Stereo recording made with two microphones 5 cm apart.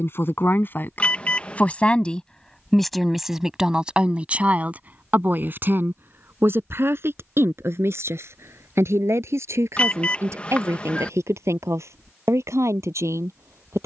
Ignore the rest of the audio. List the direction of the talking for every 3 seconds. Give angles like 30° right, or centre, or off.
30° left, 30° right, 60° right, 70° right, 70° right.